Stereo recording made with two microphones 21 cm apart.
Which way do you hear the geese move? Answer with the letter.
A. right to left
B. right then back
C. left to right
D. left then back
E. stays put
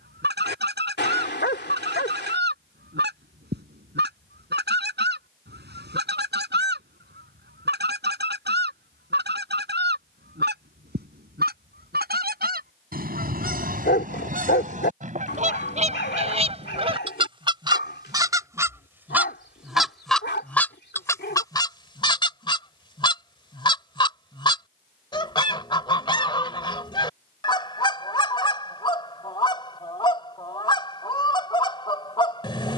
A.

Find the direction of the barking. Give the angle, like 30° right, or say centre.
50° left.